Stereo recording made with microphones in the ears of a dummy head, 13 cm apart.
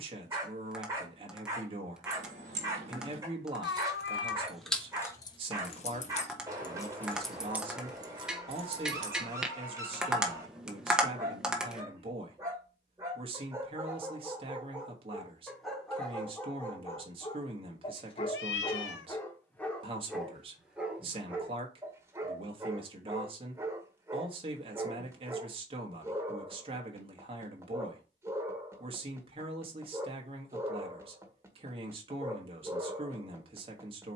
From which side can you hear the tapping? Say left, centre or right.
centre.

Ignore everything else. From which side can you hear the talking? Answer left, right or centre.
right.